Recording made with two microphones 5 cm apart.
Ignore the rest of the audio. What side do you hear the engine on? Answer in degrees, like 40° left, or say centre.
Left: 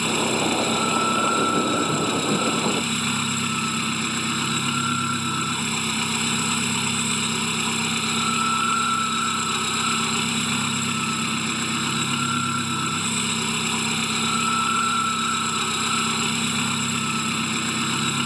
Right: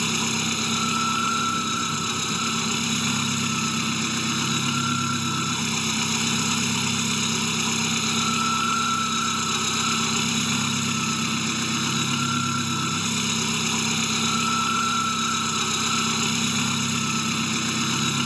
10° left.